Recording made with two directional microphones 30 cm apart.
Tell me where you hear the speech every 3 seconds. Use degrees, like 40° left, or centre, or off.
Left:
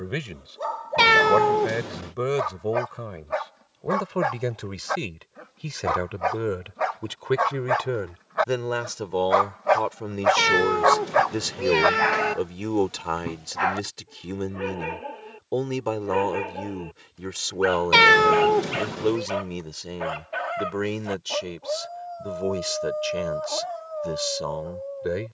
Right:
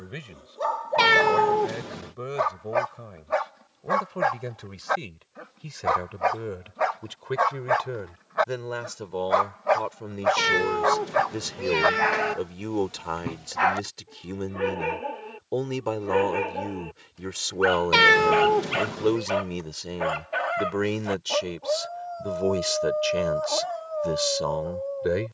60° left, 50° left, 50° left, 40° left, 20° left, 10° left, centre, 10° right, 10° right.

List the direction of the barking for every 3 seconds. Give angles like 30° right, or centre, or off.
10° right, 10° right, centre, 20° left, 10° right, 10° right, 10° right, 10° right, 10° right.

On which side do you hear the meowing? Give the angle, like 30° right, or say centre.
20° left.